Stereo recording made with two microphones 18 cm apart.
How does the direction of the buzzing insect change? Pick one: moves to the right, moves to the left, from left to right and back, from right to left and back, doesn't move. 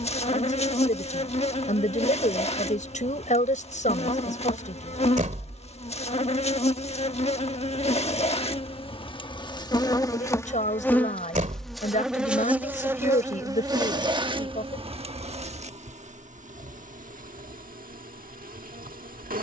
moves to the right.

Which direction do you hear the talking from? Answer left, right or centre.
left.